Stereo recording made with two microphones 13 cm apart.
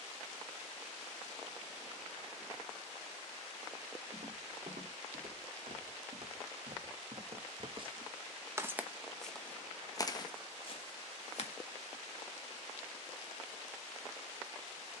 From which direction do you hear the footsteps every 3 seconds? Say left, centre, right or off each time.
off, right, right, left, off.